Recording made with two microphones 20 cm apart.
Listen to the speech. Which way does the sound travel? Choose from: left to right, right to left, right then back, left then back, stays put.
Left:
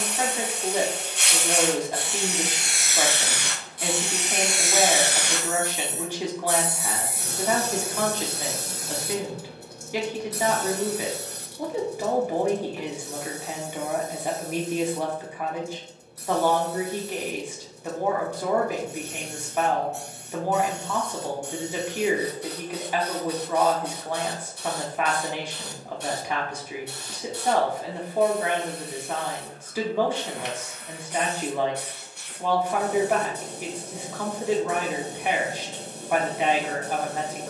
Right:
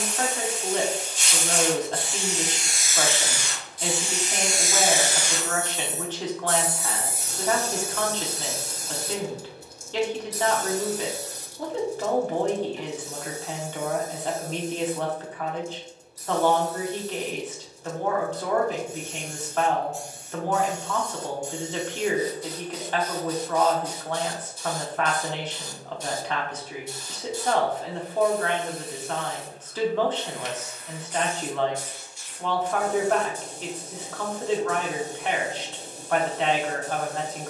stays put.